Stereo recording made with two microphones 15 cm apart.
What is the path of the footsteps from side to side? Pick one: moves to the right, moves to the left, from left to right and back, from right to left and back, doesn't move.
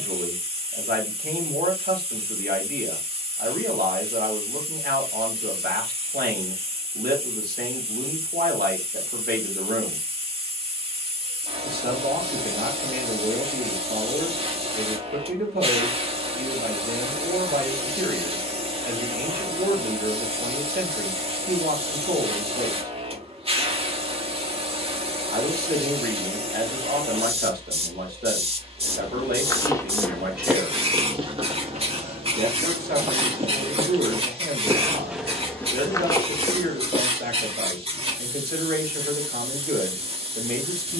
from left to right and back.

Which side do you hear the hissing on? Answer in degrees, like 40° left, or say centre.
40° right.